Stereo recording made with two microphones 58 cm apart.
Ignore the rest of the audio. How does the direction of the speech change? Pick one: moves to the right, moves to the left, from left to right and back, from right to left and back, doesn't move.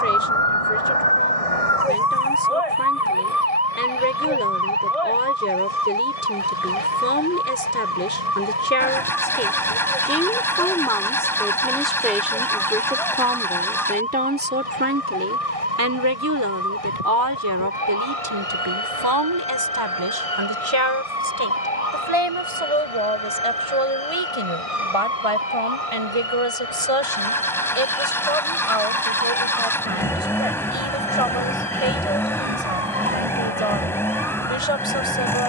moves to the right.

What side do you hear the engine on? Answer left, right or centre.
centre.